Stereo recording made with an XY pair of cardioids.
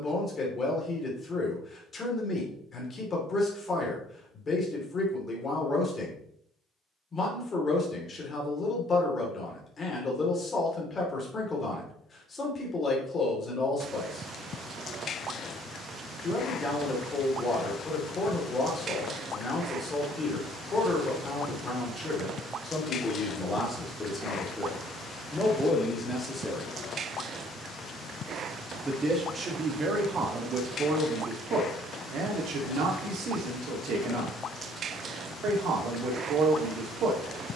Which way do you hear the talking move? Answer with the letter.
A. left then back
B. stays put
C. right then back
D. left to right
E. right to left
D.